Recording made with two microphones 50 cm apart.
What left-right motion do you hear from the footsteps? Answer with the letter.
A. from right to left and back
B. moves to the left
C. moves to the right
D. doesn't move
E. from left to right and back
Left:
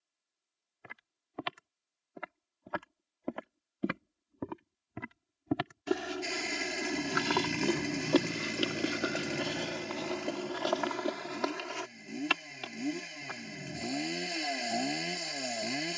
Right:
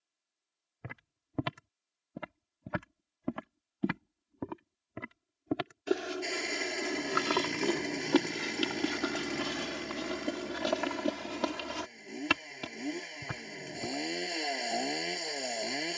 A.